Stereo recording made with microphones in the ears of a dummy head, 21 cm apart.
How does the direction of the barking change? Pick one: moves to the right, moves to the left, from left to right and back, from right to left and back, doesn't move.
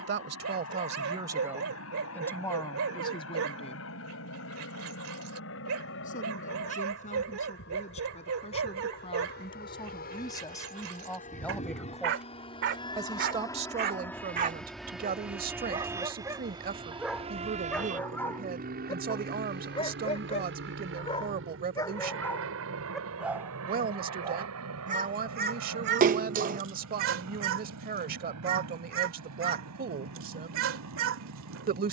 from right to left and back.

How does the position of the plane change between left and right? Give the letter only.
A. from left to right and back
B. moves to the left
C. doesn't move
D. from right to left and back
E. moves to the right
E.